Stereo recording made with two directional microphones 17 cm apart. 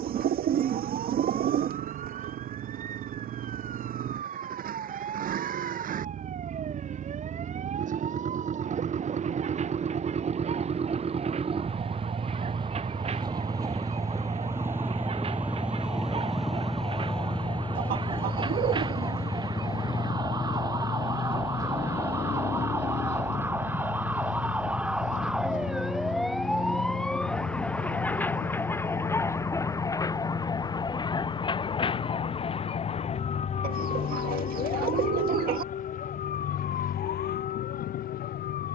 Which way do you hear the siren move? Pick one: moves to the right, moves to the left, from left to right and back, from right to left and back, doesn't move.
moves to the left.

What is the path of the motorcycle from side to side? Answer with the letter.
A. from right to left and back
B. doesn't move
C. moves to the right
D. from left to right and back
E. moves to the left
E.